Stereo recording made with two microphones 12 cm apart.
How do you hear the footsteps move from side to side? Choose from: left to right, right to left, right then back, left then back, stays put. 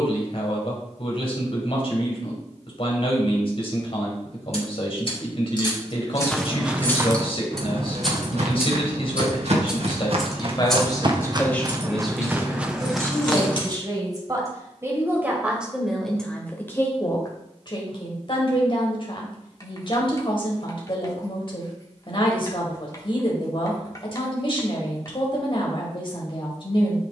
right then back.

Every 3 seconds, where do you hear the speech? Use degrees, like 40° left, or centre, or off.
50° left, 50° left, 50° left, 30° left, 20° right, 10° left, 40° left, 40° left, 40° left.